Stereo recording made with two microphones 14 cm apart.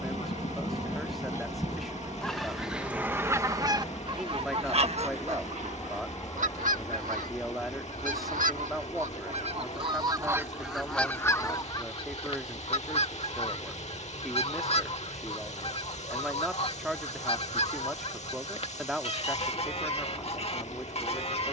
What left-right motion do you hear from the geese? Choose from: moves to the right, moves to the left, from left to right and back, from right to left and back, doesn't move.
from left to right and back.